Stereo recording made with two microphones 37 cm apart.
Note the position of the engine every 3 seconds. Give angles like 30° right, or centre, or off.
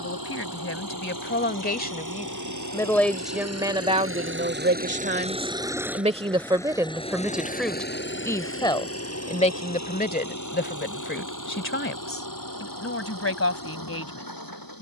60° right, 30° right, 20° left, 50° left, 60° left.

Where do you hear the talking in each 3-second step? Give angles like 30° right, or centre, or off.
30° left, 20° right, centre, 30° left, 40° left.